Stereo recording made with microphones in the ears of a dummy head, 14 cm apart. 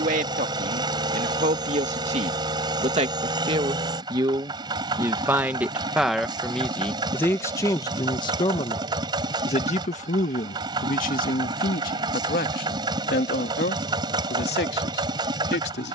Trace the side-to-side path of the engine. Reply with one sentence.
You can hear the engine stay put.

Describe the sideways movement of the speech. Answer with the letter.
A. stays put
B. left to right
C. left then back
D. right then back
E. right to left
E.